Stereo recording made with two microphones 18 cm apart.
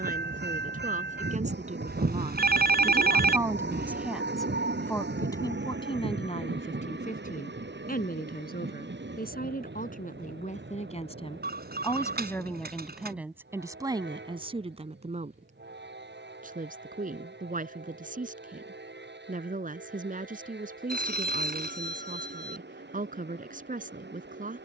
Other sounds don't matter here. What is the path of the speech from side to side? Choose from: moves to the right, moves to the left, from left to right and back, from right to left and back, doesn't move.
from right to left and back.